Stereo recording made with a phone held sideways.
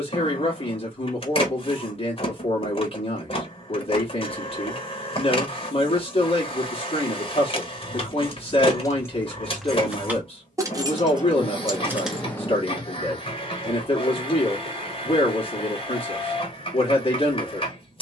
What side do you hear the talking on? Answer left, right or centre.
left.